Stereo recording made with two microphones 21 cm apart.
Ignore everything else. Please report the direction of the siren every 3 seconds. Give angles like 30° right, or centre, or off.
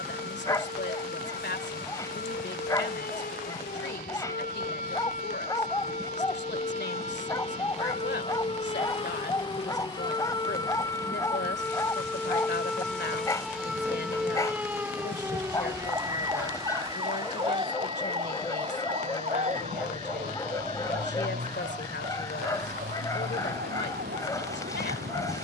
50° left, 40° left, 30° left, 20° left, centre, 20° right, 40° right, 50° right, 50° right.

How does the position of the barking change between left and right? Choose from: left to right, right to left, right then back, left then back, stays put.
stays put.